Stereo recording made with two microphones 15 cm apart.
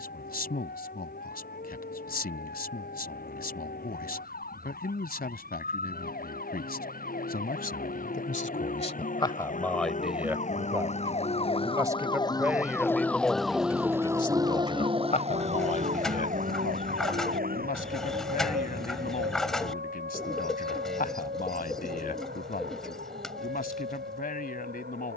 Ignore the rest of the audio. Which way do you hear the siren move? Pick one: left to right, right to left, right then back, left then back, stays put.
left to right.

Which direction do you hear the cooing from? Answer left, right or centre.
centre.